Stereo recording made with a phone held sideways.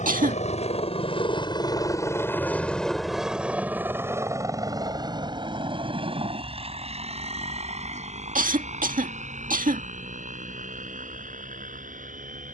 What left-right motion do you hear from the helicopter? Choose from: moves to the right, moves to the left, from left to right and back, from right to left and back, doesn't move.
moves to the right.